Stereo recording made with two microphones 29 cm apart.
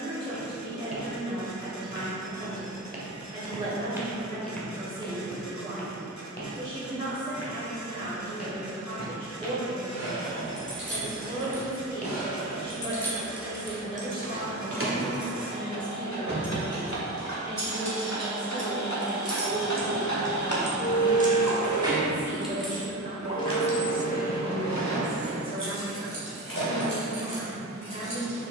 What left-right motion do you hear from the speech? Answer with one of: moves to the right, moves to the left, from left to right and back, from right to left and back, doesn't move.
from right to left and back.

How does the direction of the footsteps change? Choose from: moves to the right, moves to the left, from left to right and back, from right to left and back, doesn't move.
from right to left and back.